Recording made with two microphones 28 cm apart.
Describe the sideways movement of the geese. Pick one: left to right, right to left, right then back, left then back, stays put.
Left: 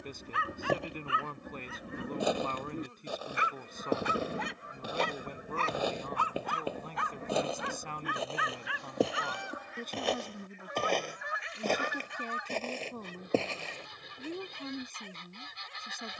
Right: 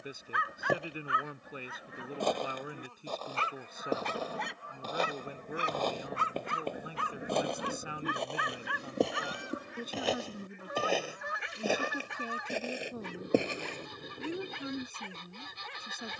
left to right.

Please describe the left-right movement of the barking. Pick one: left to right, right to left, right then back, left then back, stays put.
left to right.